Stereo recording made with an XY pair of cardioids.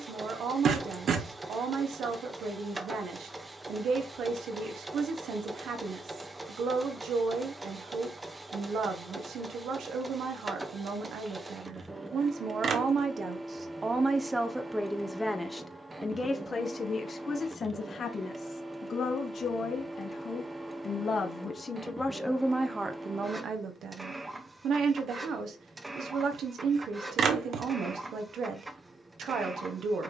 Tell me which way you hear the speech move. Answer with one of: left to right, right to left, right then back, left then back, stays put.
left then back.